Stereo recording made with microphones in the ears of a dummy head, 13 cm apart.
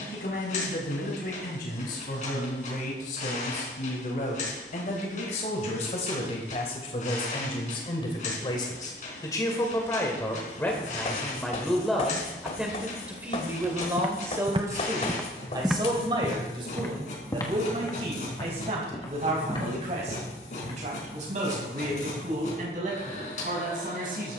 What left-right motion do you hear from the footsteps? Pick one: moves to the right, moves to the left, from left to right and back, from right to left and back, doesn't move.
moves to the left.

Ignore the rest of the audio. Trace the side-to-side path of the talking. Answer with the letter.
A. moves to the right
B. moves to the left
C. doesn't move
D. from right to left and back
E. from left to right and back
A.